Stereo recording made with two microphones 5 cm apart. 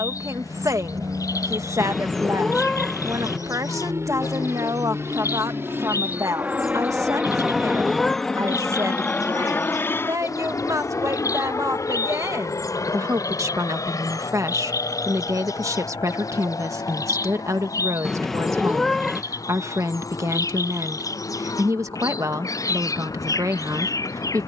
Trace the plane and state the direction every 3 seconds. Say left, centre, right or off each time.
right, right, centre, left, left, left, left, left.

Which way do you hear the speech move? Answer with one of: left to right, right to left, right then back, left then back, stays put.
stays put.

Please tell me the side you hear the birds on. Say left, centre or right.
left.